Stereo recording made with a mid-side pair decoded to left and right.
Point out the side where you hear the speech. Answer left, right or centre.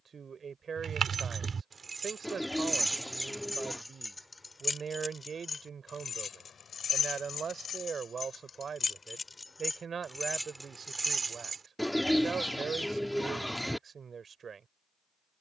right.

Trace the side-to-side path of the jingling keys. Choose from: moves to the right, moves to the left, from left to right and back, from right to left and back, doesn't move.
from right to left and back.